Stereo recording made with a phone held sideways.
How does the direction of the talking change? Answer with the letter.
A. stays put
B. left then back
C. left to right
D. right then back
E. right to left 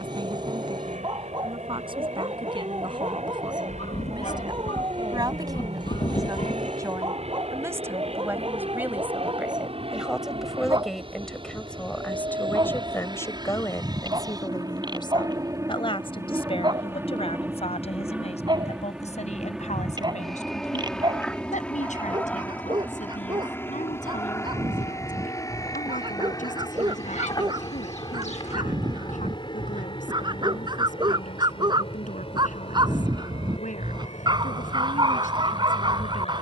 E.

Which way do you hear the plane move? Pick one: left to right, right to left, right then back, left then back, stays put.
right to left.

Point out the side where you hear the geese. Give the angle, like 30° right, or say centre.
60° left.